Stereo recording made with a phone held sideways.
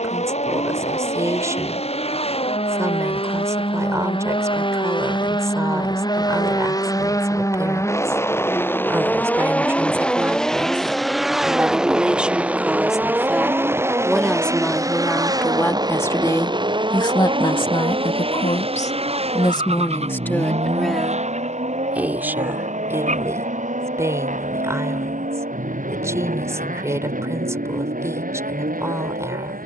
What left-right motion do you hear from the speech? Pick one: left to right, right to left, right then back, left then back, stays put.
left then back.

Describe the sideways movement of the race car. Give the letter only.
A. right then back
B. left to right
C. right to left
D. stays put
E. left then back
B.